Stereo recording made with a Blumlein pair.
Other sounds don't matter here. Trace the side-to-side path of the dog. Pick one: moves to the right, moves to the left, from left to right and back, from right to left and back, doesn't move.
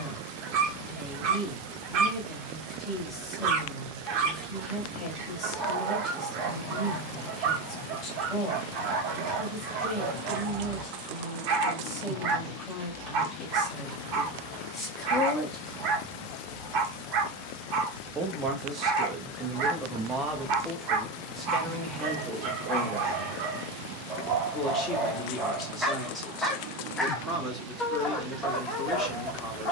moves to the left.